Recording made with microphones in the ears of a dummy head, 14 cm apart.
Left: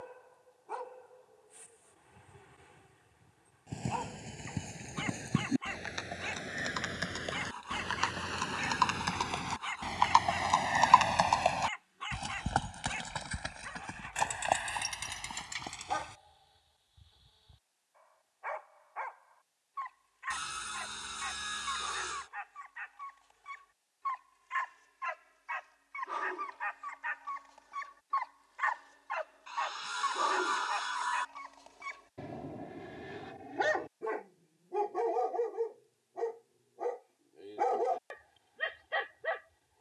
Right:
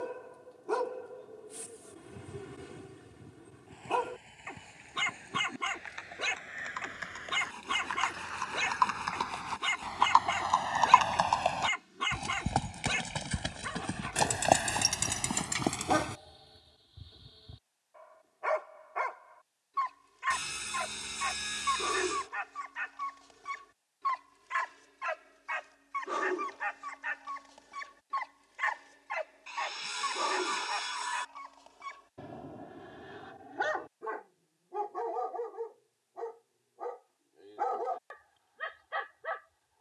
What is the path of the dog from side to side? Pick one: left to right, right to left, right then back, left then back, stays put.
right to left.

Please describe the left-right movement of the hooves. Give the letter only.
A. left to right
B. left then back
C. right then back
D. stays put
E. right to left
A.